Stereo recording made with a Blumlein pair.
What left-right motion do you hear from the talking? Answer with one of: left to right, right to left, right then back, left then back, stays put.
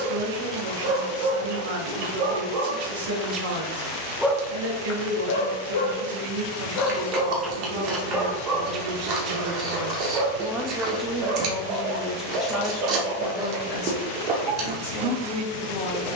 right to left.